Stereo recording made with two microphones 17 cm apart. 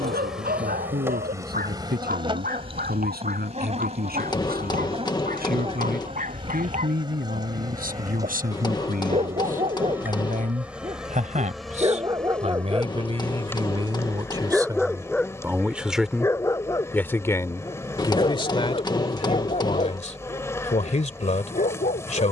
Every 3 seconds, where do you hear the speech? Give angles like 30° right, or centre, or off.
70° right, 70° right, 60° right, 50° right, 30° right, centre, 40° left, 50° left.